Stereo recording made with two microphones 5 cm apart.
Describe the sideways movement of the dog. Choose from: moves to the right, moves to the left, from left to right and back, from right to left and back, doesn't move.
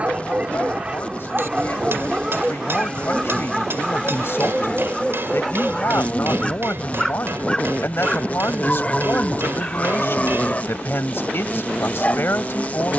moves to the left.